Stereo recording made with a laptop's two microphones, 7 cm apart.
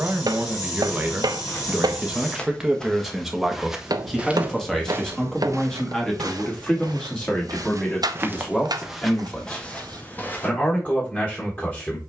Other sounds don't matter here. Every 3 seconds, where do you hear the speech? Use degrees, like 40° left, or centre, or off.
20° right, 10° left, 20° left, 20° left.